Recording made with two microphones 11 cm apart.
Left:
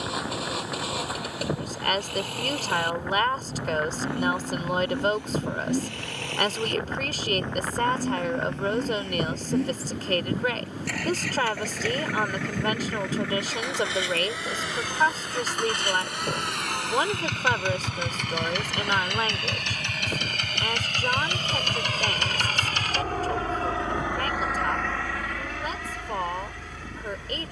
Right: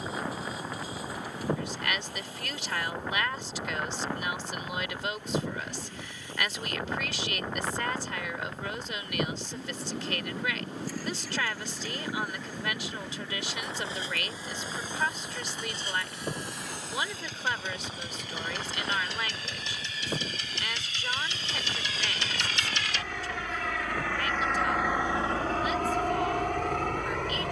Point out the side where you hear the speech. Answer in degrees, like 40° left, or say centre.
50° left.